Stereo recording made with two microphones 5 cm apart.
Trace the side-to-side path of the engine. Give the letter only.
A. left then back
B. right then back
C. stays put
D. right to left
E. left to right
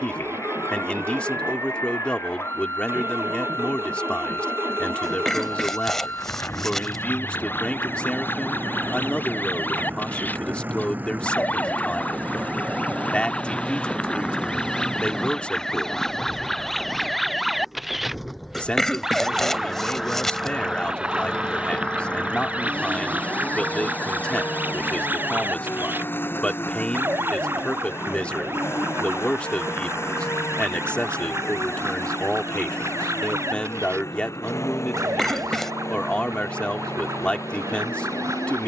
D.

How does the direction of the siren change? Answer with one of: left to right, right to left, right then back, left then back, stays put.
left to right.